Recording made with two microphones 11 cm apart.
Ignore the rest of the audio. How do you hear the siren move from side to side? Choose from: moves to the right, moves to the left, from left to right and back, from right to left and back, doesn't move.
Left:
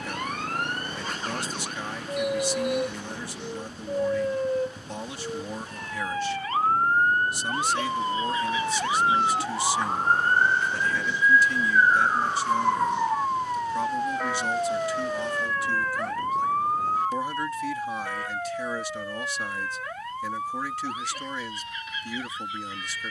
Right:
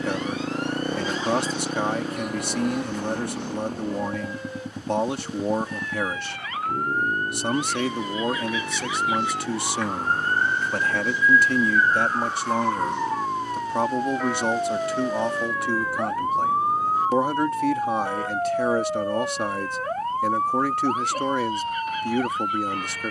moves to the right.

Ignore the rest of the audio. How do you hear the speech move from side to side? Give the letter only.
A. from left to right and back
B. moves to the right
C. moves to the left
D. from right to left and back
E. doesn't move
E.